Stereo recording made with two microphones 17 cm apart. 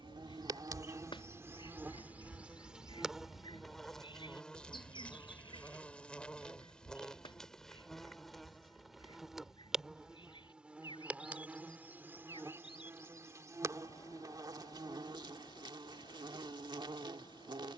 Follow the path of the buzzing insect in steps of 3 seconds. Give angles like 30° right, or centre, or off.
10° right, centre, centre, 10° right, 20° right, 30° right.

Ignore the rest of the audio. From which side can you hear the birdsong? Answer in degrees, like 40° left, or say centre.
30° left.